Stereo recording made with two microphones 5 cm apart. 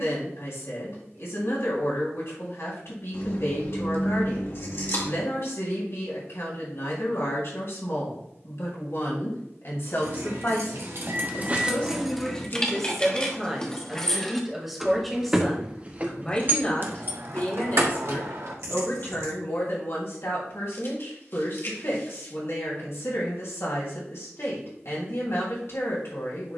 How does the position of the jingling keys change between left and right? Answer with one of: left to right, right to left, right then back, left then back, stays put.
left then back.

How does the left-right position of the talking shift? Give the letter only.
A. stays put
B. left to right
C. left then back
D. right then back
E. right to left
D.